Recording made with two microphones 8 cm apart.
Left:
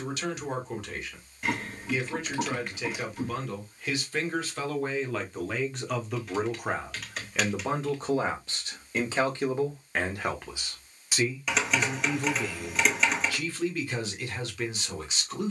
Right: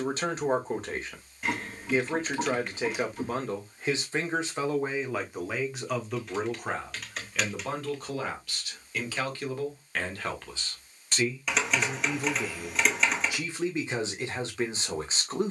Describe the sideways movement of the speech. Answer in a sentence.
You can hear the speech move from right to left and back again.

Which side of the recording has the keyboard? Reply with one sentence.
In this clip you hear the keyboard in the centre.